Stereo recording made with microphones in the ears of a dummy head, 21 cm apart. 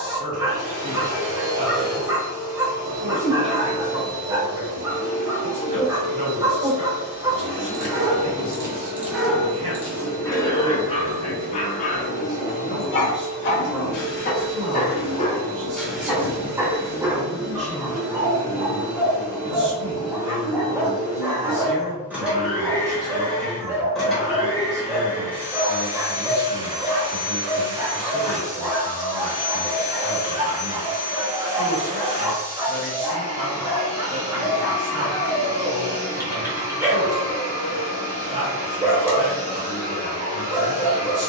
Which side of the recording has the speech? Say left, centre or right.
right.